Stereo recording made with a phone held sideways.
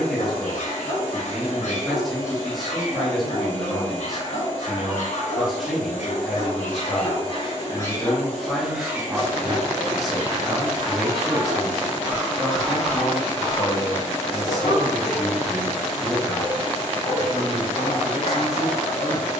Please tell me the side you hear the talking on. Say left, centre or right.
centre.